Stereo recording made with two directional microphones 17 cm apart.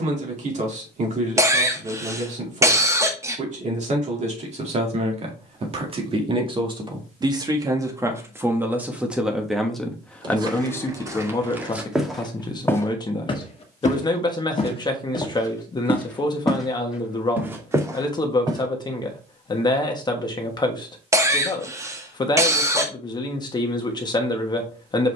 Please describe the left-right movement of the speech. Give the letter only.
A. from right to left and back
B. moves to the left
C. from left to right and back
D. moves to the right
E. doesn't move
B.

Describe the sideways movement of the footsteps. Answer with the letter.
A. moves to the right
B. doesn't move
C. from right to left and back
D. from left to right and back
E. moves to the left
C.